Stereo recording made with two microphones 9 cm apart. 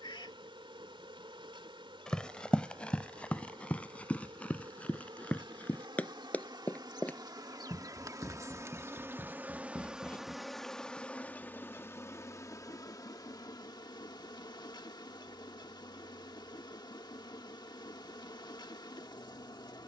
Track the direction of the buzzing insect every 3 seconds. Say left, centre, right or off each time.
right, right, right, centre, left, left, left.